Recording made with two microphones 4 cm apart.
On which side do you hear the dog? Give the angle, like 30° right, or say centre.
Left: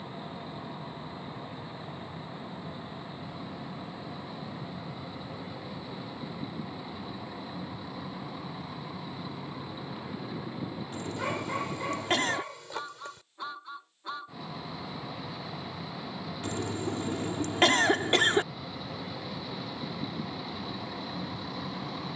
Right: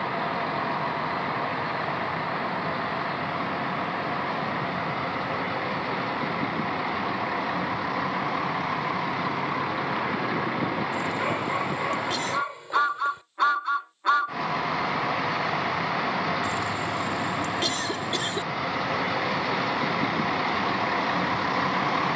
20° right.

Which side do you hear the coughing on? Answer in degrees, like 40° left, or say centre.
50° left.